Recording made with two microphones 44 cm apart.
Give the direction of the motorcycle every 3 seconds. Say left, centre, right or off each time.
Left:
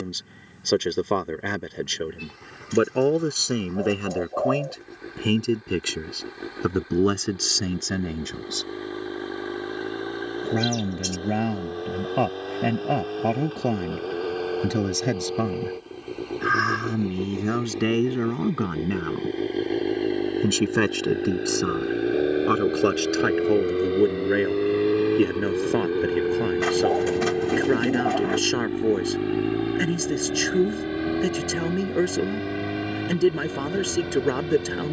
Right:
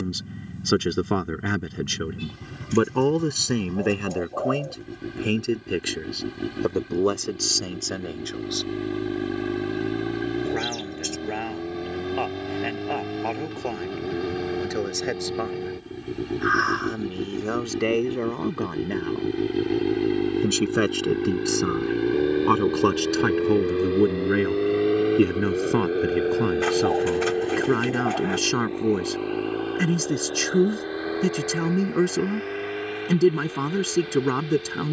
right, right, right, right, right, right, right, centre, centre, left, left, left.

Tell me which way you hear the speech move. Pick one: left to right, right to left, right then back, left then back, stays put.
left then back.